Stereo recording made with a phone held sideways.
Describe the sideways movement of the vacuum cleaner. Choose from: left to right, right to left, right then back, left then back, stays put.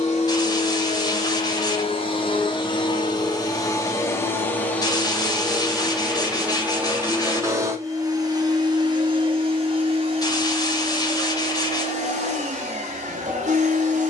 left to right.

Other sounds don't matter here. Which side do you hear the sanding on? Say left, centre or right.
left.